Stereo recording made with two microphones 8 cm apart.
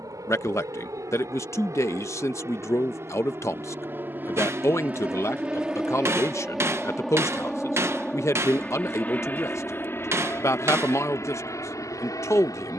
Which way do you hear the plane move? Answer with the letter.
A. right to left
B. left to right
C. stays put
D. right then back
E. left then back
A.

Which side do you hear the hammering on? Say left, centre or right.
right.